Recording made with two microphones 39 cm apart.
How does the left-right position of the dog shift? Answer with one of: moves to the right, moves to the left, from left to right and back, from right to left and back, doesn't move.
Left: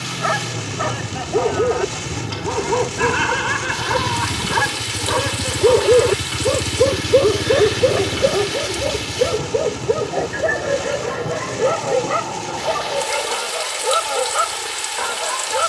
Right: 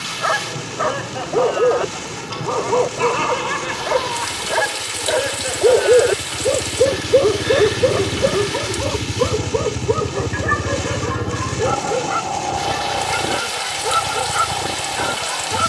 moves to the right.